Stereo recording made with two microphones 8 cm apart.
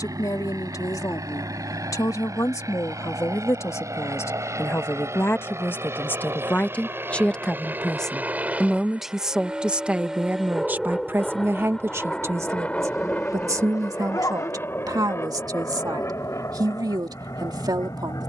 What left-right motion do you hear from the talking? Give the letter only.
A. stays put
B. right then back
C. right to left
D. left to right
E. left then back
D.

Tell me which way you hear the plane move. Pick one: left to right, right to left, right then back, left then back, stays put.
right to left.